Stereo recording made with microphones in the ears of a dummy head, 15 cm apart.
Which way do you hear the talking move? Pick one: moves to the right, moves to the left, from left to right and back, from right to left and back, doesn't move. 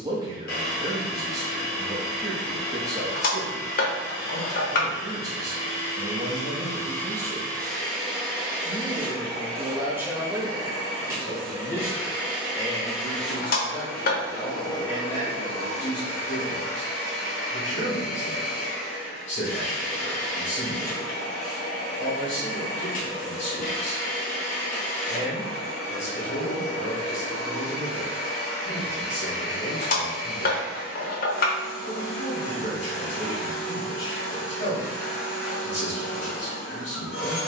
moves to the left.